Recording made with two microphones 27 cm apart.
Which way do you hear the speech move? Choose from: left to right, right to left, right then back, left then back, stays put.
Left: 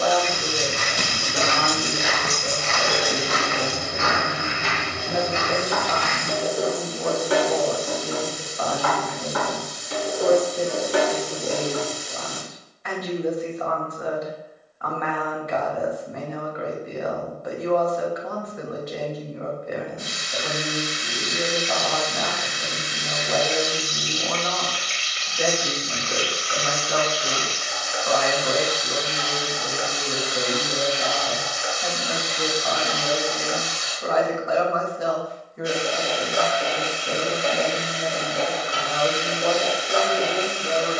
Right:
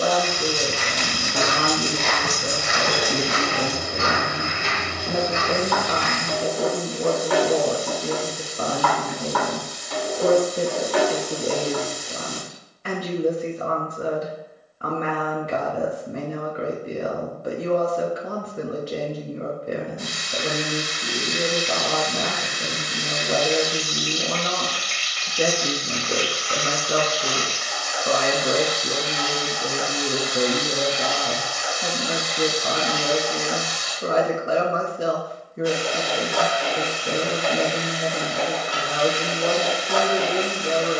stays put.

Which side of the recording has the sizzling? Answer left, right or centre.
left.